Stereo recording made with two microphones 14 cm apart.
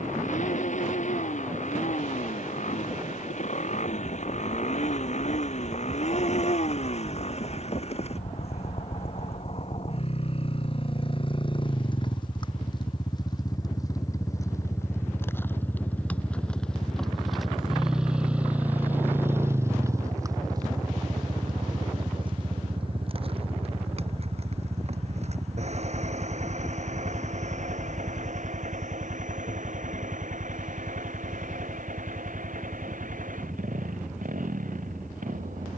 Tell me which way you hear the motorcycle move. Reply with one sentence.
You can hear the motorcycle travel towards the right.